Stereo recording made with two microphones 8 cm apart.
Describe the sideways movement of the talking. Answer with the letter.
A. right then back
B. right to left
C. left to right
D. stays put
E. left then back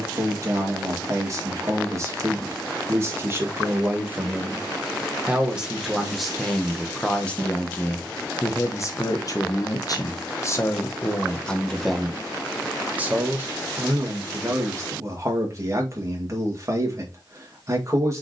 E.